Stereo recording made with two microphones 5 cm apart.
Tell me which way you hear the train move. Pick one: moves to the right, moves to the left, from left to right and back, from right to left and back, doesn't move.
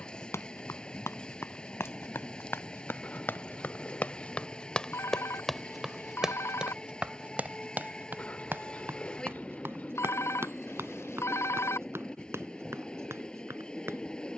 doesn't move.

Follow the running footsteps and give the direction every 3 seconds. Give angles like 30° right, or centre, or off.
60° left, 20° left, 30° right, 60° right, 60° right.